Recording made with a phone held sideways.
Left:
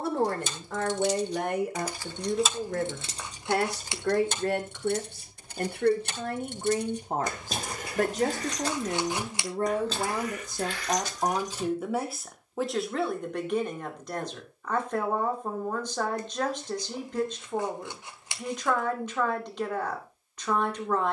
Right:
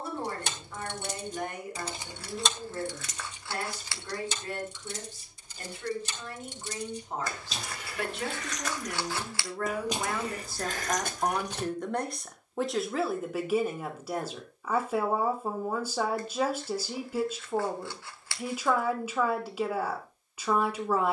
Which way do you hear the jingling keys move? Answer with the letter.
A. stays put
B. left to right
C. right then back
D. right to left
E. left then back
E.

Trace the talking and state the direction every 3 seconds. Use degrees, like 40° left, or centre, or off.
80° left, 70° left, 50° left, 20° left, centre, 10° right, 10° right.